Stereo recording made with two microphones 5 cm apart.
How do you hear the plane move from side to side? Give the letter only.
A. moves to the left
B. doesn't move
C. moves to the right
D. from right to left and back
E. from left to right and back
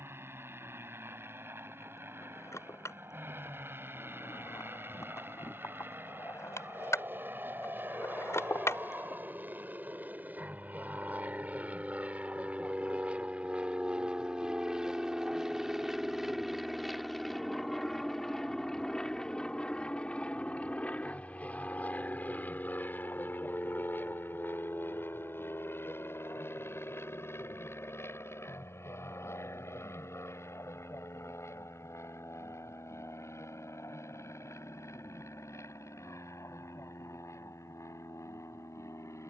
A.